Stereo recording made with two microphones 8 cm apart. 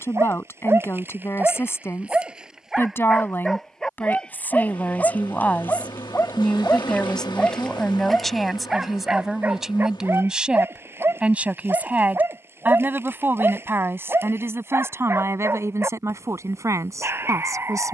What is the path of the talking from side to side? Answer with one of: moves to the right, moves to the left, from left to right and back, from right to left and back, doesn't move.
moves to the right.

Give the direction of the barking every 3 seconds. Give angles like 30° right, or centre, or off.
20° right, 10° left, 10° left, 30° right, 30° right, 30° right.